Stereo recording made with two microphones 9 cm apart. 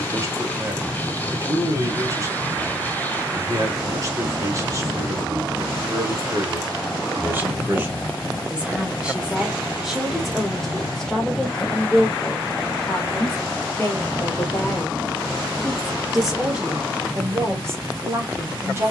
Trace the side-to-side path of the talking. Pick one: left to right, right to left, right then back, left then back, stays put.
left then back.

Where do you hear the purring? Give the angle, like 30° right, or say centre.
20° left.